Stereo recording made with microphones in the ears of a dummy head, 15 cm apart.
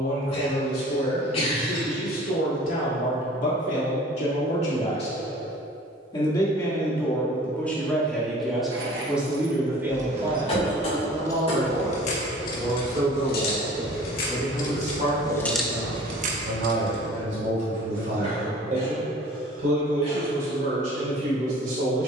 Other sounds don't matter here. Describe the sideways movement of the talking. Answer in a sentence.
You can hear the talking move to the right.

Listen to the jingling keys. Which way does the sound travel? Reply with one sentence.
You can hear the jingling keys move from right to left and back again.